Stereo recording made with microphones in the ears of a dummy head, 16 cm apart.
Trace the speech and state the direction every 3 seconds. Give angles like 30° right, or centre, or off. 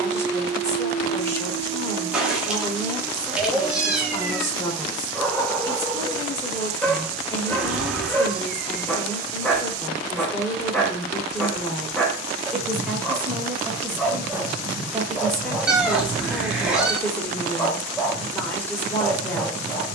20° left, 20° left, 20° left, 20° left, 10° right, 10° left, 10° left.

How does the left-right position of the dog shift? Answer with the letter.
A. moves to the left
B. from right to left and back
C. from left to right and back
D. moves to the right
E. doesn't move
E.